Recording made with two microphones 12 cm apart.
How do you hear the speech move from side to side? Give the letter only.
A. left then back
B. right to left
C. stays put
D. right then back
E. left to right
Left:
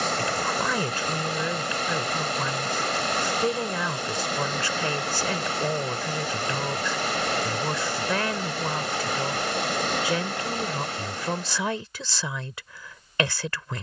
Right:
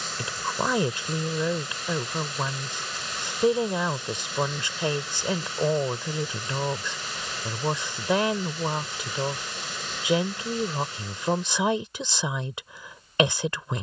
C.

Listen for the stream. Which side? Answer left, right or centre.
left.